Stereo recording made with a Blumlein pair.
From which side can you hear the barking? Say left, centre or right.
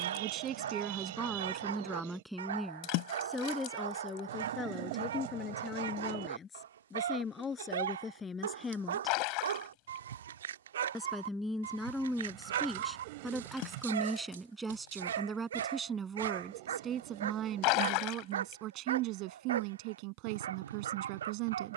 right.